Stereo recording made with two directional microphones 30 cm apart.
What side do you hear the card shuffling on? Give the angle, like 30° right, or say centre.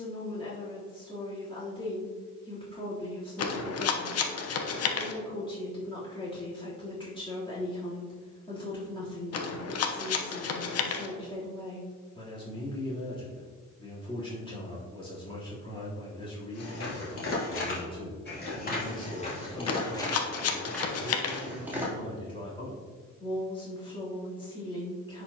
50° left.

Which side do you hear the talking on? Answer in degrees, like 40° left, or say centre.
20° left.